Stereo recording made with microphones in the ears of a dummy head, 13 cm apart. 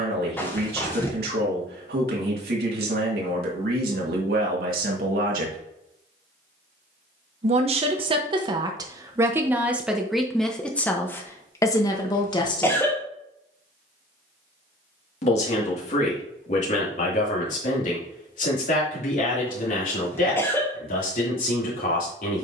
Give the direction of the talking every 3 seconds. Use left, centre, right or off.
right, right, right, centre, left, left, left, left.